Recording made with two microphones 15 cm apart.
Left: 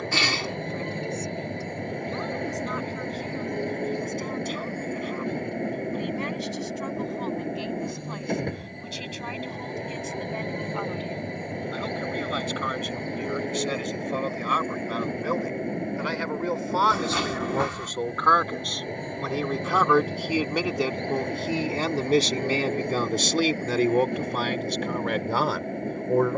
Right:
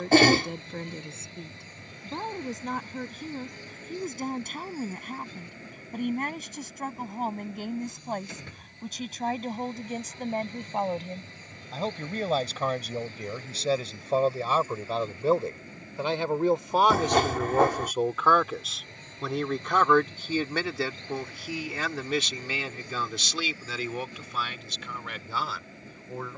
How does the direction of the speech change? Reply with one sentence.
In this clip you hear the speech move from right to left.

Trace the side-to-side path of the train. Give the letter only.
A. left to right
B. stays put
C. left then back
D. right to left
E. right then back
B.